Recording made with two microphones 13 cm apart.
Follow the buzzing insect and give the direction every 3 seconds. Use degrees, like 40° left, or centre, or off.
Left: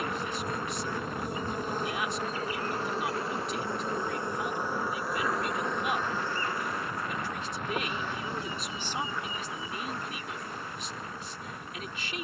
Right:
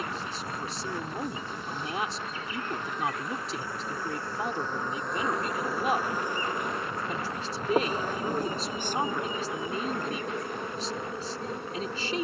40° left, 10° left, 30° right, 60° right.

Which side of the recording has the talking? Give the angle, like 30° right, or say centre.
30° right.